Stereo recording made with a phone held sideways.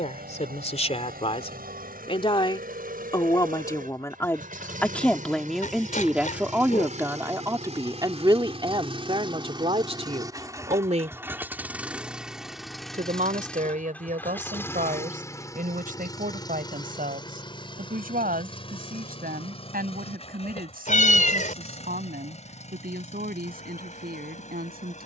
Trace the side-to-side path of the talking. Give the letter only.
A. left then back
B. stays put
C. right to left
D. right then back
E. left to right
E.